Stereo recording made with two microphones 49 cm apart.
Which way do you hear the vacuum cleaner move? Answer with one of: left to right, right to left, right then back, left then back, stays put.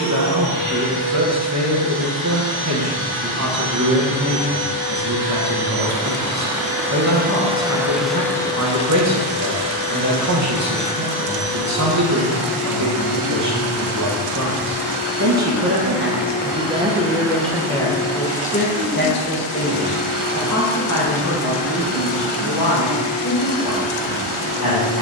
right to left.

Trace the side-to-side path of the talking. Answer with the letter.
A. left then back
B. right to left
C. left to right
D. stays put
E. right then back
B.